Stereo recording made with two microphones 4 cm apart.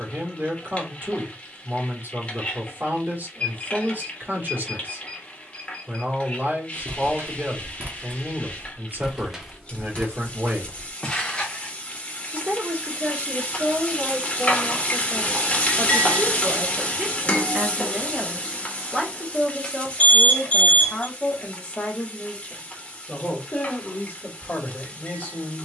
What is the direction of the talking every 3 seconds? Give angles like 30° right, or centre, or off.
50° right, 50° right, 50° right, 50° right, 50° right, 30° right, centre, 30° left, 40° left.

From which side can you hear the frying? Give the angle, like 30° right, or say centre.
30° left.